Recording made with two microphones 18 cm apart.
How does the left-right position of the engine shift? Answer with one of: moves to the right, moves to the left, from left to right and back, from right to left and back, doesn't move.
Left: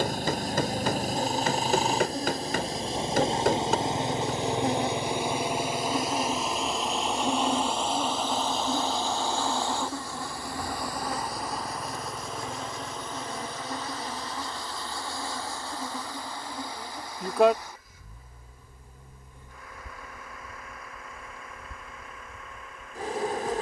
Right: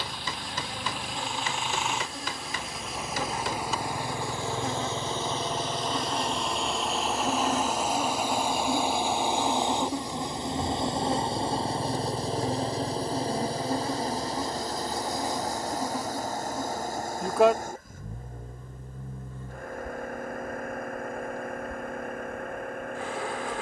moves to the right.